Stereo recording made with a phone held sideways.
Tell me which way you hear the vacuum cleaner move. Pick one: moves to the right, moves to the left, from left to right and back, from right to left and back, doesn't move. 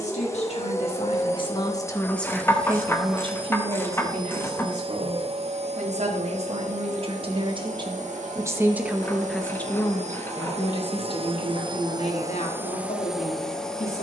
from left to right and back.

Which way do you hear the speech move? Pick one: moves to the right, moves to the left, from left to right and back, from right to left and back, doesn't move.
from left to right and back.